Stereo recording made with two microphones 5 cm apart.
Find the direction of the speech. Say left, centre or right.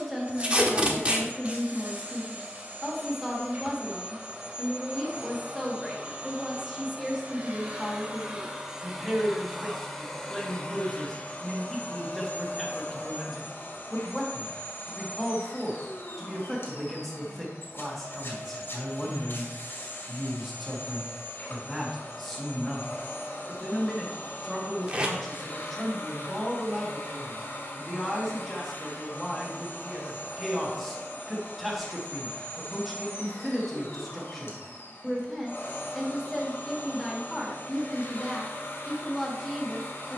centre.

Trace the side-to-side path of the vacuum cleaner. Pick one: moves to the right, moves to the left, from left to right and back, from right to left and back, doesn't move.
moves to the left.